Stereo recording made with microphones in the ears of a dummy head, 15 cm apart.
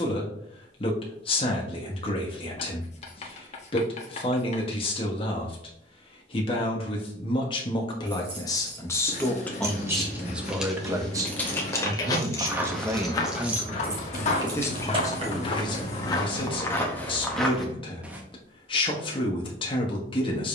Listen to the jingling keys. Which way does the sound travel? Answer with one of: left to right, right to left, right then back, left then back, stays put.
left then back.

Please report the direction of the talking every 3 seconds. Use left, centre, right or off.
left, left, left, centre, centre, left, left.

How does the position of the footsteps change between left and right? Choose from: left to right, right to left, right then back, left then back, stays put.
left then back.